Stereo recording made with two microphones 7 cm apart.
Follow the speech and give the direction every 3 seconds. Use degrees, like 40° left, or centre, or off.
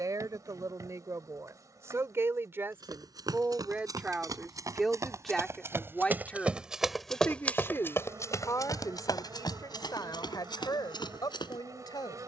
40° right, 10° right, 30° left, 60° left.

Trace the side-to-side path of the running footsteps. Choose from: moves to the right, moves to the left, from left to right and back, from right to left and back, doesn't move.
moves to the left.